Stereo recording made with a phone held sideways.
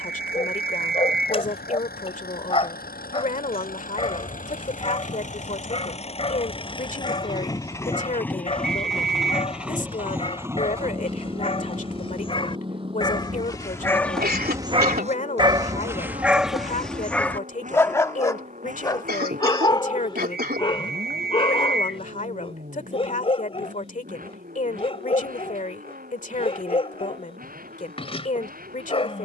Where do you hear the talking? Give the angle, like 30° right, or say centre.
50° left.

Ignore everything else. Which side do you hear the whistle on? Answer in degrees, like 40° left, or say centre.
70° right.